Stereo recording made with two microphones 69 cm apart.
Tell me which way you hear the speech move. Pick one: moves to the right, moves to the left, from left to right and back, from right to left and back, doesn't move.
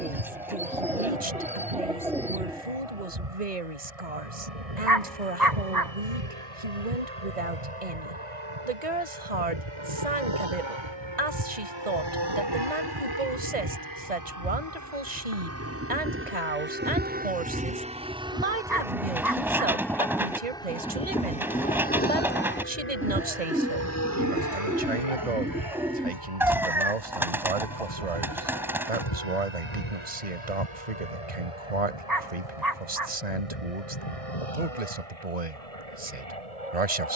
doesn't move.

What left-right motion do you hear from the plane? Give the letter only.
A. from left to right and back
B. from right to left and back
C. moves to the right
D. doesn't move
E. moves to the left
E.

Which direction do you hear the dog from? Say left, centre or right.
right.